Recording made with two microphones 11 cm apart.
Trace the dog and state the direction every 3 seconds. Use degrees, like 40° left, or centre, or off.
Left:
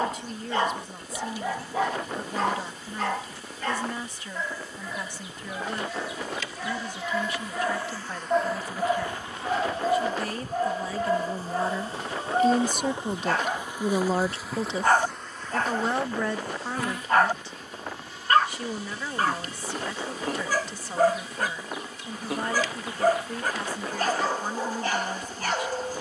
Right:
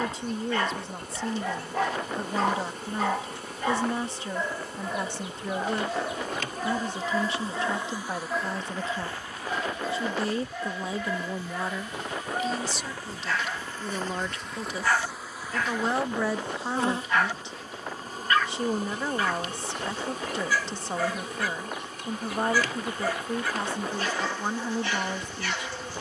10° left, 20° right, 10° left, 40° left, 40° left, 40° left, 40° left, 40° left, 40° left.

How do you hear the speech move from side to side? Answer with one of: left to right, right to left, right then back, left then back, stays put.
left then back.